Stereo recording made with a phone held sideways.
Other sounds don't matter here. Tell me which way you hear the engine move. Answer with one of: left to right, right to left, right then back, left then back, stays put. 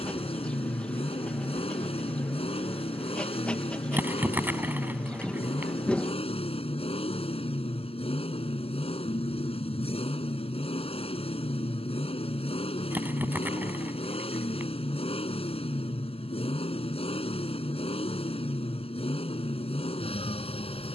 stays put.